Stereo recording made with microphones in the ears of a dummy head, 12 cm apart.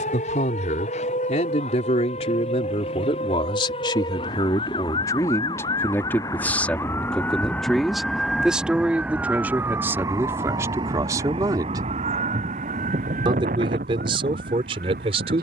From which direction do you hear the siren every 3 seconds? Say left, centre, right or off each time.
left, left, centre, right, right.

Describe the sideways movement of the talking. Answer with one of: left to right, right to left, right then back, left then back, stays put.
left to right.